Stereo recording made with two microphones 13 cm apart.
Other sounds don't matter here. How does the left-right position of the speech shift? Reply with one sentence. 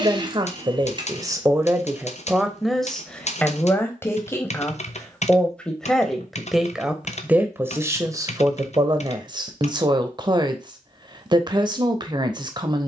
In this clip you hear the speech go left and come back.